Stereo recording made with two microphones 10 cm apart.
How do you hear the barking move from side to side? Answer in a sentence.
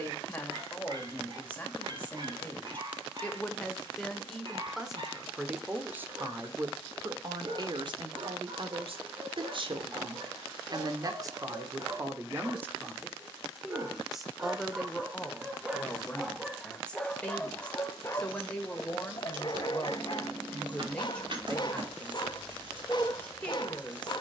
You can hear the barking move to the left.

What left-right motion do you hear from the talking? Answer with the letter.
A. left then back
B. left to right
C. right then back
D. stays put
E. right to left
C.